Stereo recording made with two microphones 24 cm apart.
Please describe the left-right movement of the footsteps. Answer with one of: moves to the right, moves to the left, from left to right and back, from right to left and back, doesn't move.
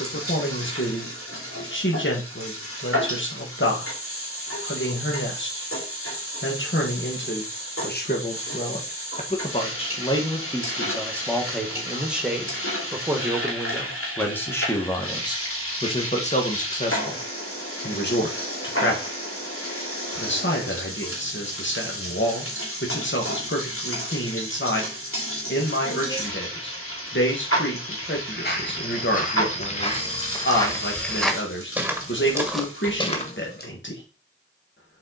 from left to right and back.